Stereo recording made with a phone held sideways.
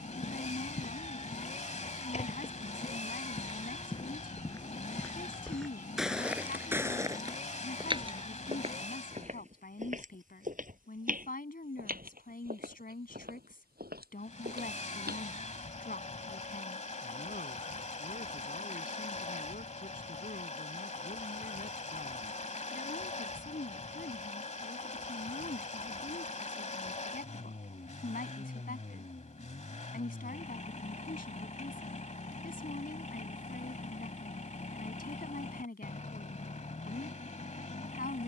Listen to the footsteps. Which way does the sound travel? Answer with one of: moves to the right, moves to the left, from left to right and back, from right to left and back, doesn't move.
moves to the right.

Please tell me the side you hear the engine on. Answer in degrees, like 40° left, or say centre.
50° left.